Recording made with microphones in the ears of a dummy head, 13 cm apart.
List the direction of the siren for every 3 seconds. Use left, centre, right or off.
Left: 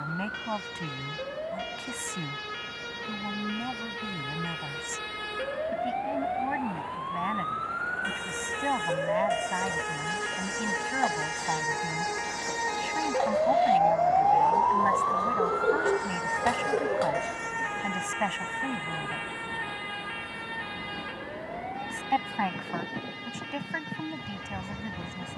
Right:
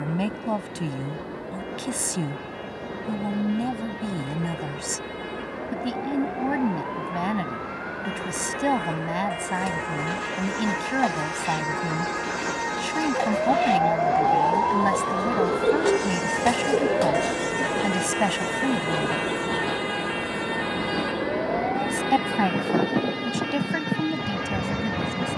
left, left, left, left, centre, right, right, right, right.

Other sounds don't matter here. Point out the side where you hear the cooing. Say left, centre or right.
right.